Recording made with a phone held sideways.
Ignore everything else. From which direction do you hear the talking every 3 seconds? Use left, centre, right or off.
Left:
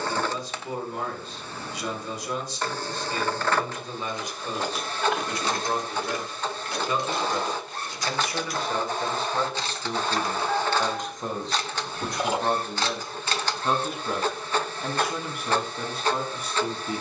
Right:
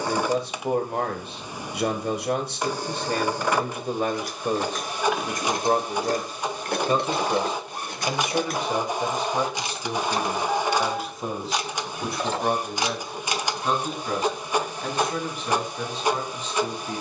right, right, right, centre, centre, centre.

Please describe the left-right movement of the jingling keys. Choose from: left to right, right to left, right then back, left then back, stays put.
right then back.